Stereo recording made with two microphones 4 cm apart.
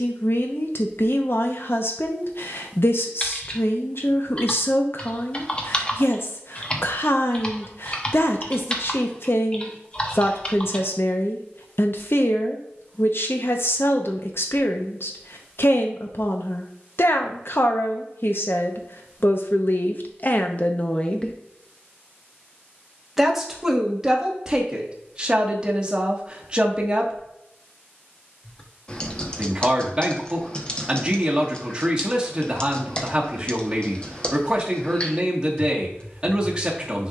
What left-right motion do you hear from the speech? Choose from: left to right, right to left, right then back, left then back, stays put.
left to right.